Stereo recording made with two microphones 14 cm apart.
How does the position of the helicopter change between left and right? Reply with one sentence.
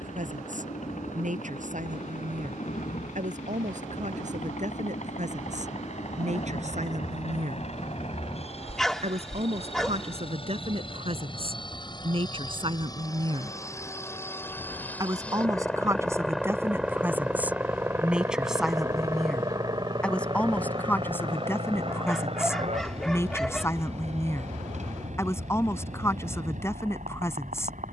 In this clip you hear the helicopter travel towards the right.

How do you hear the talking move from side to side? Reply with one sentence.
You can hear the talking go from the right side to the left.